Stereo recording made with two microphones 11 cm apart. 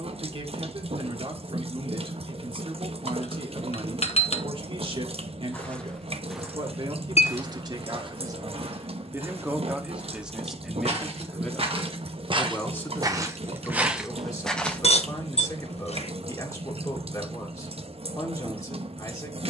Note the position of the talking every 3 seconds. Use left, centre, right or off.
right, right, right, centre, left, left, left.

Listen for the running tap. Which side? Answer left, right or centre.
right.